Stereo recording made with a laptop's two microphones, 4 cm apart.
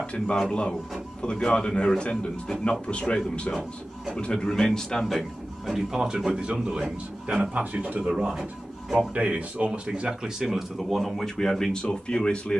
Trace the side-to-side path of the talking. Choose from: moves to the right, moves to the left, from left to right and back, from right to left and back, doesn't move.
from left to right and back.